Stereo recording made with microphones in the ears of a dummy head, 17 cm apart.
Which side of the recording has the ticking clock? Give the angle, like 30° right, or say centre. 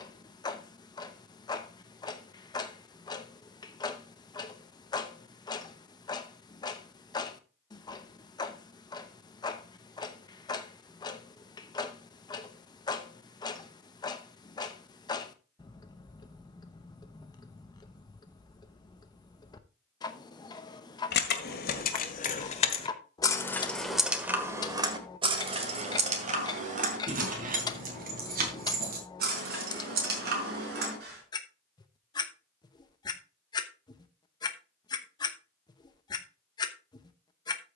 20° left.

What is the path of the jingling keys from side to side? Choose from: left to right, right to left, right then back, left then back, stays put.
left to right.